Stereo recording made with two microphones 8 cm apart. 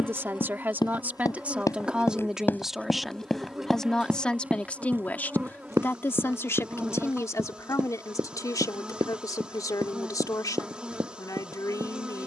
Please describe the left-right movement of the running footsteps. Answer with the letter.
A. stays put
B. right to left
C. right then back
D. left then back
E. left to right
E.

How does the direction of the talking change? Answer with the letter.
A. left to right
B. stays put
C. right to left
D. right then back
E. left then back
C.